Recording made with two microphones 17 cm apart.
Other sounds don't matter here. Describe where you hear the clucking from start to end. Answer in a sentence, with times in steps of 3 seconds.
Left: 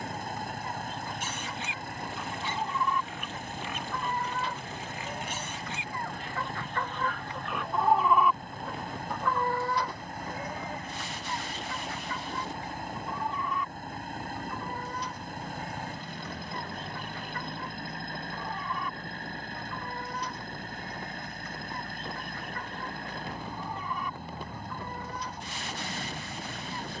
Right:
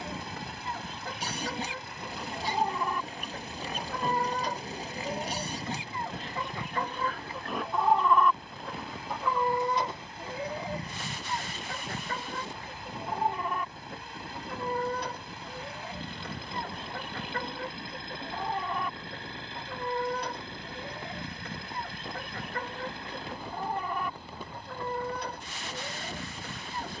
You can hear the clucking on the right from 0 s, in the centre from 6 s and on the right from 9 s.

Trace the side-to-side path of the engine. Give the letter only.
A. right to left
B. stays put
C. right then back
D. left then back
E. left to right
B.